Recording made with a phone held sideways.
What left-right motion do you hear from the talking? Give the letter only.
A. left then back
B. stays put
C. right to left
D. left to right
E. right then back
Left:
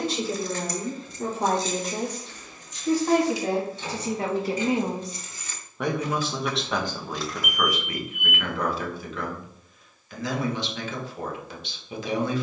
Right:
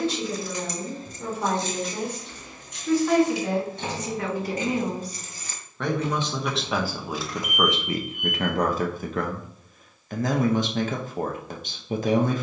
D.